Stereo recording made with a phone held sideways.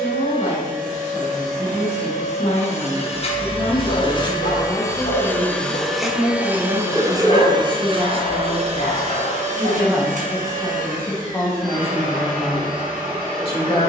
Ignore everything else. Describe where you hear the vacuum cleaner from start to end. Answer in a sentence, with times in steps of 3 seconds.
You can hear the vacuum cleaner on the left from 0 s and on the right from 6 s.